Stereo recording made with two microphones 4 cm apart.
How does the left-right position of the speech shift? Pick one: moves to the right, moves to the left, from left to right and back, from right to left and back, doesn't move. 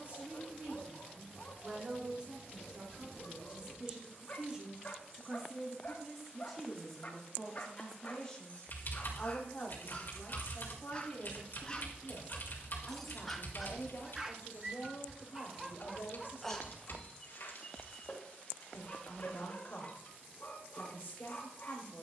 moves to the left.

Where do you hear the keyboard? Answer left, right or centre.
left.